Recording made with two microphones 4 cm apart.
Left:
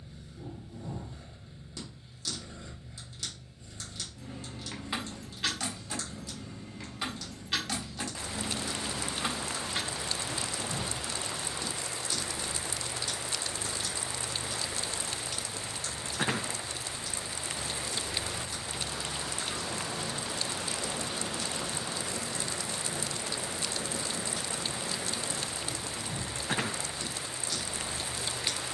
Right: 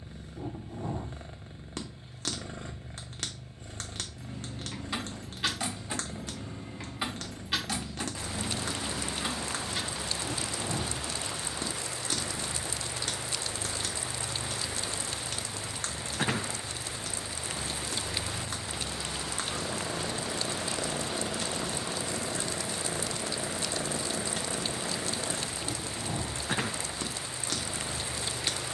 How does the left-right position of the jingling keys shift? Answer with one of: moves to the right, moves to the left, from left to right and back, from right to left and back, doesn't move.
from left to right and back.